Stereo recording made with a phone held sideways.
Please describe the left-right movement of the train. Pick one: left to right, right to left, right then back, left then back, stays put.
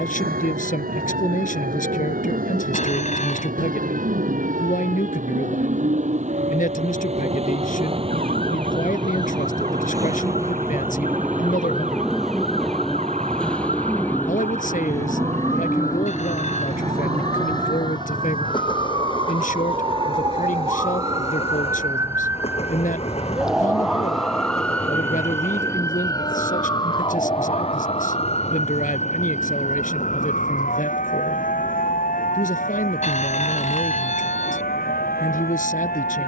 right to left.